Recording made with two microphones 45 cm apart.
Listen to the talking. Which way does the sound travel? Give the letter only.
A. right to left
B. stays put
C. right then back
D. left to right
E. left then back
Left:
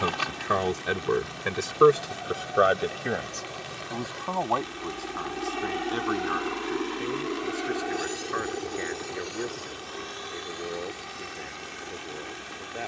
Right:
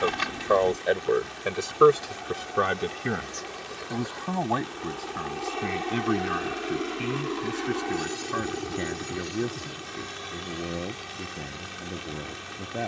D.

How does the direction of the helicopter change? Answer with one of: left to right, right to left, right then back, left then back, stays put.
left to right.